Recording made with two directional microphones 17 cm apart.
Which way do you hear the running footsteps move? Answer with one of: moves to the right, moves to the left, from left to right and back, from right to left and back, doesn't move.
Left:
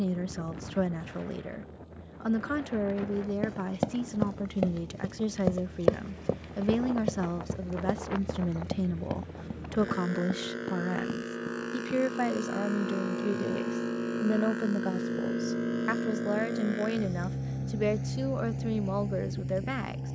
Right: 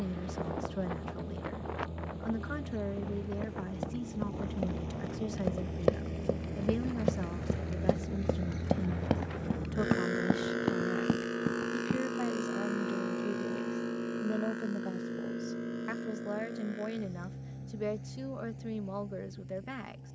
moves to the right.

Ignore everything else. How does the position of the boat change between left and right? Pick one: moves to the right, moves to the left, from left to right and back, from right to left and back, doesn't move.
moves to the left.